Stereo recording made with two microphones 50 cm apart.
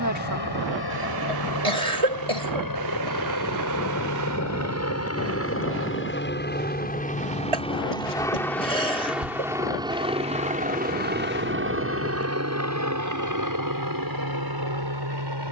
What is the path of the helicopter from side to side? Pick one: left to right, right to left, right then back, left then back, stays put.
left to right.